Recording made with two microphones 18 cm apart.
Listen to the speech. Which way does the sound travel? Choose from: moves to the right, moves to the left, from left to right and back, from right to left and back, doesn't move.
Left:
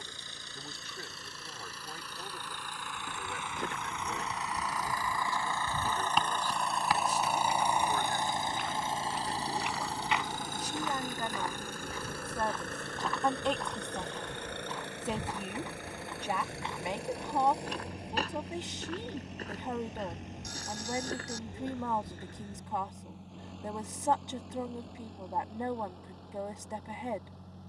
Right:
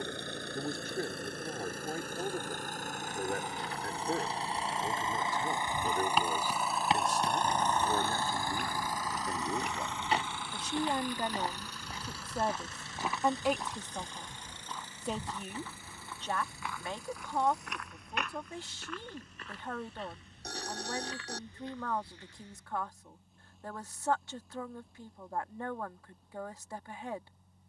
moves to the left.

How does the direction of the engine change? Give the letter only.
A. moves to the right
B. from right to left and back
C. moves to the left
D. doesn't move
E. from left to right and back
C.